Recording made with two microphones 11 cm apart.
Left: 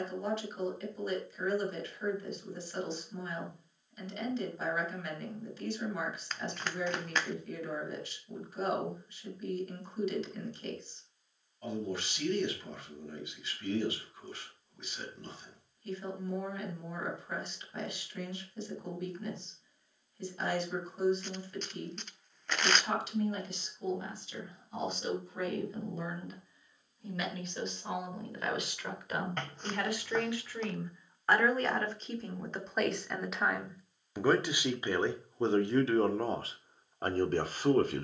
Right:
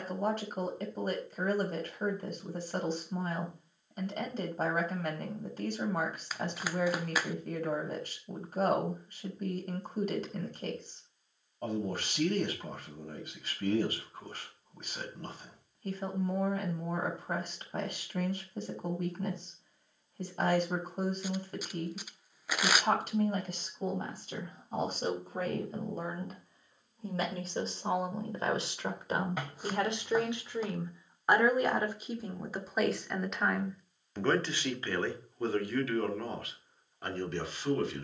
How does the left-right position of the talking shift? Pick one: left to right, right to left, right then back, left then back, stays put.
right to left.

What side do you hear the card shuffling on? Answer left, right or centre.
centre.